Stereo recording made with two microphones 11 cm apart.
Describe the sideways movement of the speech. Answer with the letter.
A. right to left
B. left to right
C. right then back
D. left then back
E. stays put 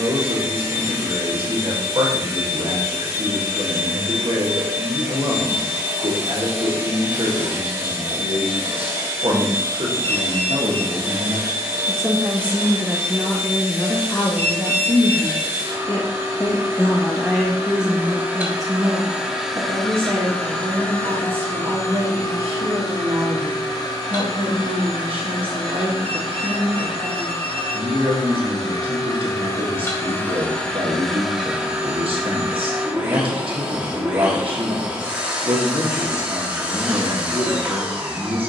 D.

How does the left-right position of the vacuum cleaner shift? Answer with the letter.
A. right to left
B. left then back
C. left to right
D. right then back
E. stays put
B.